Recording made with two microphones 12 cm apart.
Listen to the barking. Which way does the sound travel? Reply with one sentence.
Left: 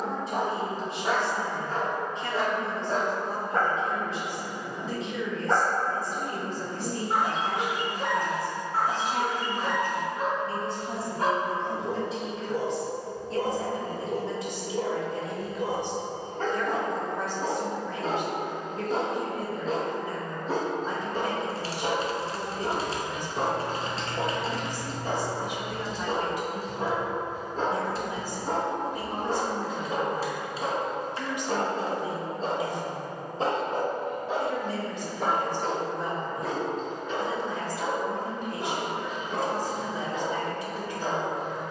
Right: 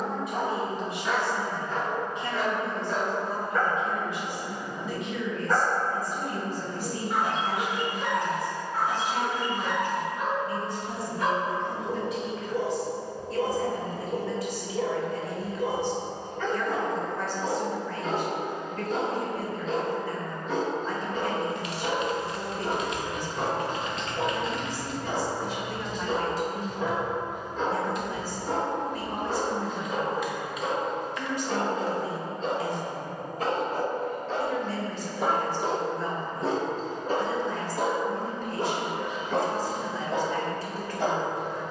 You can hear the barking go from the left side to the right.